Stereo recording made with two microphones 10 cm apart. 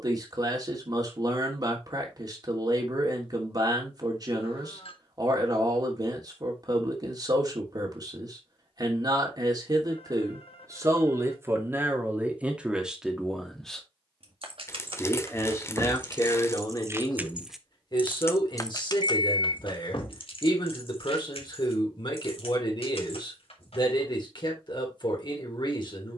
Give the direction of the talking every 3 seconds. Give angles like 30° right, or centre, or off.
40° right, 40° right, 40° right, 30° right, centre, 40° left, 50° left, 50° left, 50° left.